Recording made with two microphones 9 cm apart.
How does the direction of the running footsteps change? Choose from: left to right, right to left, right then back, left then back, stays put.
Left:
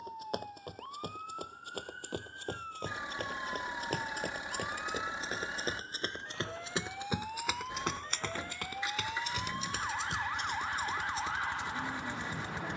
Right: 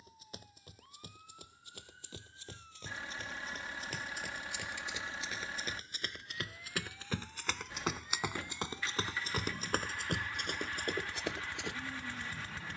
left to right.